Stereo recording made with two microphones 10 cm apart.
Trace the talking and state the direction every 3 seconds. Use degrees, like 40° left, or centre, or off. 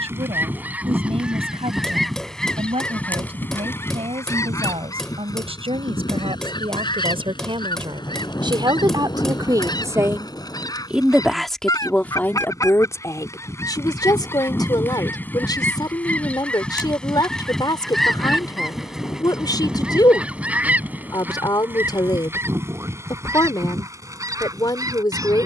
80° right, 70° right, 60° right, 20° right, 30° left, 40° left, 40° left, 40° left, 40° left.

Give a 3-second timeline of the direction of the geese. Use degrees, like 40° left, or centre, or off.
10° right, 30° left, 50° left, 40° left, 30° left, 10° left, 10° right, 20° right, 30° right.